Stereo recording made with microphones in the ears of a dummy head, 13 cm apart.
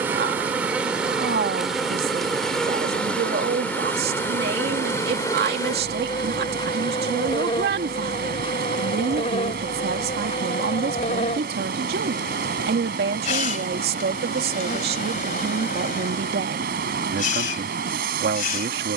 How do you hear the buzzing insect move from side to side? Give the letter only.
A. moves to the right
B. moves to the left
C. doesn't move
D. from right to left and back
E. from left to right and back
B.